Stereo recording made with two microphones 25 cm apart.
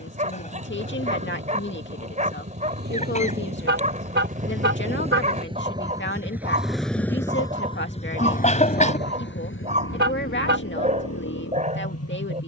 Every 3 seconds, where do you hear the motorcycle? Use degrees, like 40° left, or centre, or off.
50° right, 30° right, 20° left, 60° left.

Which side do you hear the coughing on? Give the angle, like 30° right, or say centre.
30° left.